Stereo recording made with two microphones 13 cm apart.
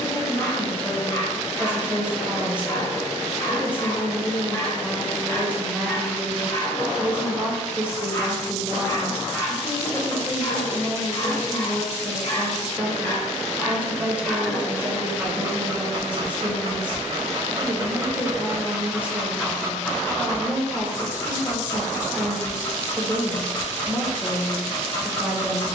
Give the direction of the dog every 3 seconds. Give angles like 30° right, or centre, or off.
20° left, 20° left, 20° left, 20° left, 10° left, 40° right, centre, 20° left, 20° left.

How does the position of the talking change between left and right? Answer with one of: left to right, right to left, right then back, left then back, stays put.
stays put.